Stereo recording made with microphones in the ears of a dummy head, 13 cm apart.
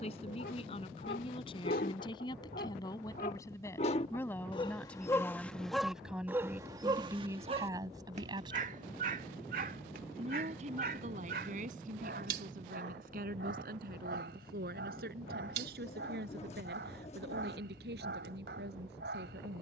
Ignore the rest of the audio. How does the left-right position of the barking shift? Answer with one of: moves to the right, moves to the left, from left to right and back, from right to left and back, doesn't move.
moves to the right.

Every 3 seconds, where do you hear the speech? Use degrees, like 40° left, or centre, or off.
40° left, 10° left, 20° right, 50° right, 60° right, 70° right, 80° right.